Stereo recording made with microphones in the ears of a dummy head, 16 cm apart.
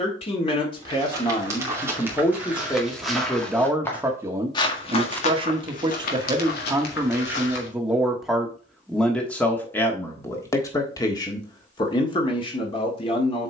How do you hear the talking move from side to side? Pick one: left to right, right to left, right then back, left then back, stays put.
right then back.